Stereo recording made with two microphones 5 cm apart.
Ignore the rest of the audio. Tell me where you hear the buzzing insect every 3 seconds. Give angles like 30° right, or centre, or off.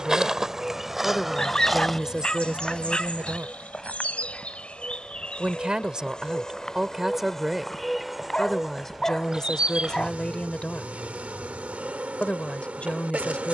centre, 20° left, centre, 30° right, 30° right.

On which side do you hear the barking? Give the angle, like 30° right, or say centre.
20° left.